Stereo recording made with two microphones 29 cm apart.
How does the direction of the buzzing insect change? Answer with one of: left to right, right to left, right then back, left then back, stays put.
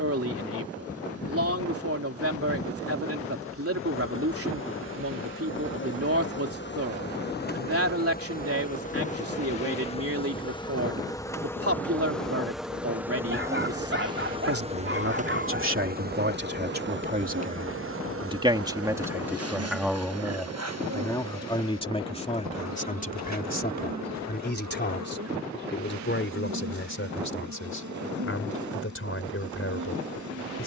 left to right.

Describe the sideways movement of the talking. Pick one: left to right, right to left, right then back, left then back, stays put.
right to left.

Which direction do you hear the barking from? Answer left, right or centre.
right.